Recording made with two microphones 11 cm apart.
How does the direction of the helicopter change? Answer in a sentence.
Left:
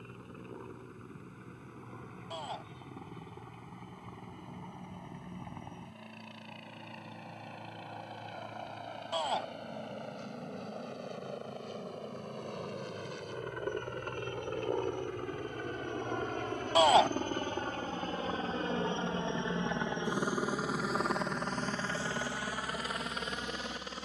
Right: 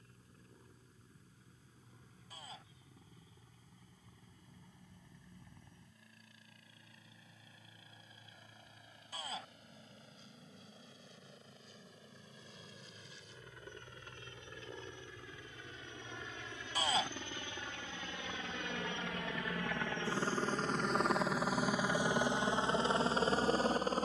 You can hear the helicopter move to the right.